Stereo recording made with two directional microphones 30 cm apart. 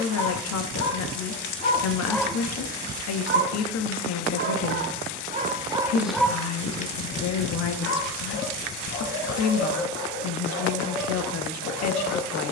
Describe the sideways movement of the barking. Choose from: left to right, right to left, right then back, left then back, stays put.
right then back.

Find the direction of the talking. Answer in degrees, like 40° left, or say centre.
60° left.